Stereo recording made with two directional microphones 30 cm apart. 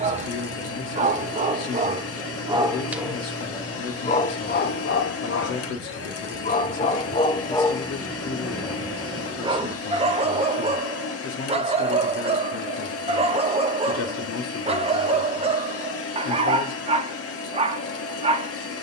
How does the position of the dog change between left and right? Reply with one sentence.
You can hear the dog move from right to left and back again.